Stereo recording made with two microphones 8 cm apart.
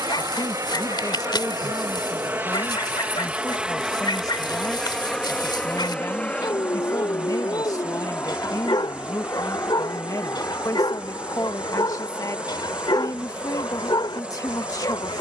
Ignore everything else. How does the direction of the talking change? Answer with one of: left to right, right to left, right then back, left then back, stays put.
stays put.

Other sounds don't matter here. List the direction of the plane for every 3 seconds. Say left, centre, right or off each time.
right, centre, left, left, left.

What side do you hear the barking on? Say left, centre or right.
left.